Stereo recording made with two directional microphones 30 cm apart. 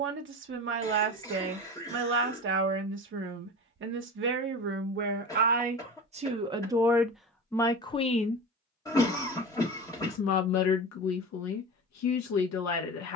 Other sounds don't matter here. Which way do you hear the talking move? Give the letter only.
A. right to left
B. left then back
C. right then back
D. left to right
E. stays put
A.